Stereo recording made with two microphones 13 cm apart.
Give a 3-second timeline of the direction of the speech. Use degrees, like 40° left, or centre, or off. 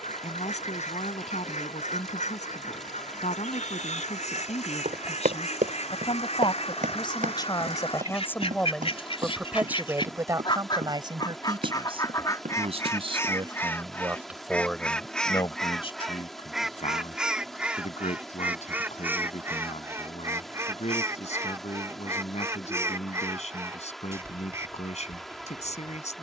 70° left, 60° left, 30° left, 30° right, 30° right, 50° left, 60° left, 60° left, 60° left.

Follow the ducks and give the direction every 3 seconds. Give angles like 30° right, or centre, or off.
70° left, 70° left, 60° left, 40° left, 20° left, centre, 20° right, 20° right, 20° right.